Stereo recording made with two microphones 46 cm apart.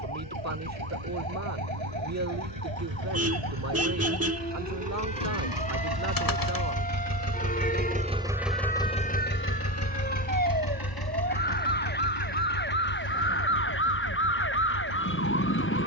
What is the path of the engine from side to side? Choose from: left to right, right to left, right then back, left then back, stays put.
right to left.